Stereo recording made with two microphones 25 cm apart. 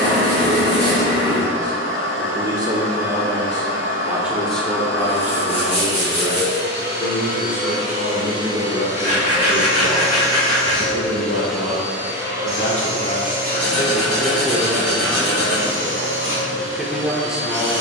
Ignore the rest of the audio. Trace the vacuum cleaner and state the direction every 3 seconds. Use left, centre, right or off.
right, right, right, centre, right, right.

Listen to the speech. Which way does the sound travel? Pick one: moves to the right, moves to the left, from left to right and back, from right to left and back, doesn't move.
from right to left and back.